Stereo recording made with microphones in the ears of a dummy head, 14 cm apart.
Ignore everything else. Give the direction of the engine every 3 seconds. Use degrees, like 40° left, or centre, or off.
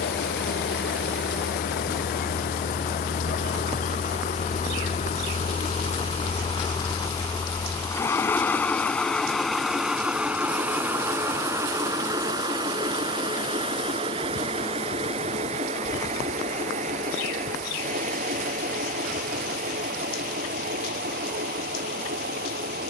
60° left, 50° left, 20° left, 10° right, 30° right, 40° right, 50° right, 60° right.